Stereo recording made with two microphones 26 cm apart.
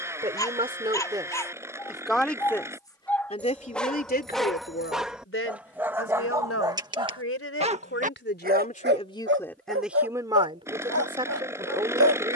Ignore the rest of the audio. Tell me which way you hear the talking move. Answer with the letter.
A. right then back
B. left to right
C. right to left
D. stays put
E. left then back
E.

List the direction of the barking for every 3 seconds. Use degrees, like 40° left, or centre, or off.
10° left, centre, 20° right, 60° right.